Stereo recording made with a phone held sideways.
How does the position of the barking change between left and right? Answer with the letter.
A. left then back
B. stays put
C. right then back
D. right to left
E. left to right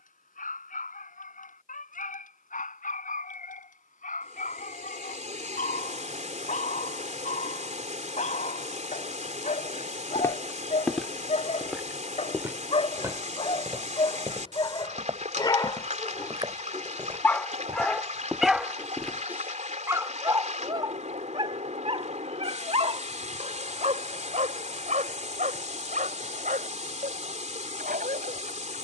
E.